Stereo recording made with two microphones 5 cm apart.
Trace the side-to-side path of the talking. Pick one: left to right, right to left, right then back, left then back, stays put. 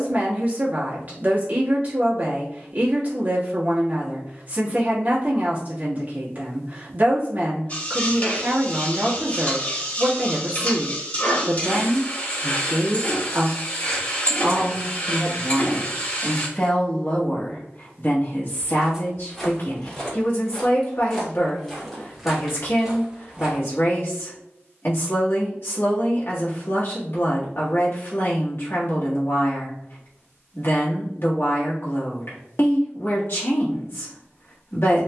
right to left.